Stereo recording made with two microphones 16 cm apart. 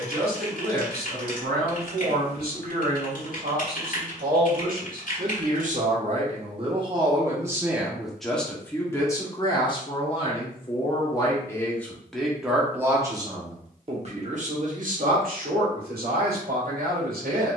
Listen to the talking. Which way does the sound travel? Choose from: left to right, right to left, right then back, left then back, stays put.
left then back.